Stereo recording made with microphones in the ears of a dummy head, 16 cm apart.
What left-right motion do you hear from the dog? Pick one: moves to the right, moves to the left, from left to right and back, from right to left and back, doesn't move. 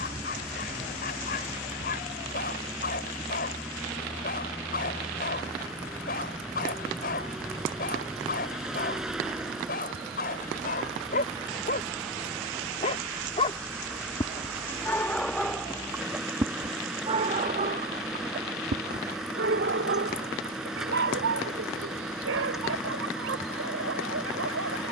moves to the right.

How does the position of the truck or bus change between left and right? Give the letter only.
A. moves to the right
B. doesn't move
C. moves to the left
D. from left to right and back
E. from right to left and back
B.